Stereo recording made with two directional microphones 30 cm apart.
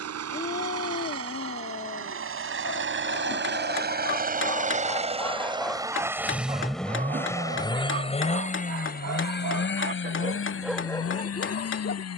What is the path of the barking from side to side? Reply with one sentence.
You can hear the barking go right and come back.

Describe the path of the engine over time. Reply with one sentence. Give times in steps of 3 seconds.
You can hear the engine on the right from 0 s, in the centre from 6 s and on the left from 9 s.